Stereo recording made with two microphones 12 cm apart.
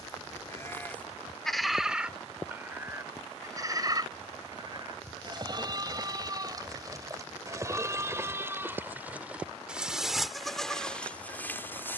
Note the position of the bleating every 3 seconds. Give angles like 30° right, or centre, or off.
centre, 30° right, 30° right, centre.